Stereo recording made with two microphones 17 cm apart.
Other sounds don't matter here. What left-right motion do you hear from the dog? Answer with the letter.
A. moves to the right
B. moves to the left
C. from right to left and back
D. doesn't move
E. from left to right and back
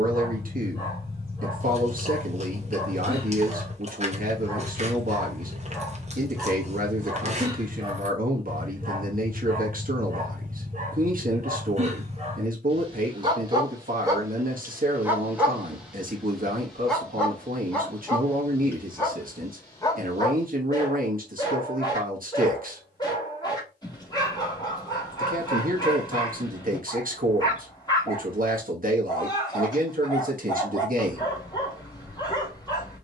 E.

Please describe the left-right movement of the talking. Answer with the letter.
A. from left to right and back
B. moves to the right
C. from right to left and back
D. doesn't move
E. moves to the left
D.